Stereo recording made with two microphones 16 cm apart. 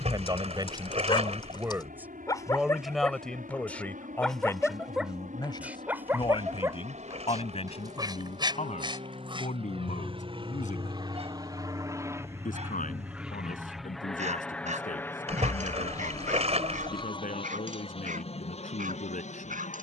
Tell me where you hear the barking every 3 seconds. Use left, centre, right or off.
left, centre, right, right, right, right, right.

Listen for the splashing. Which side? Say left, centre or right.
right.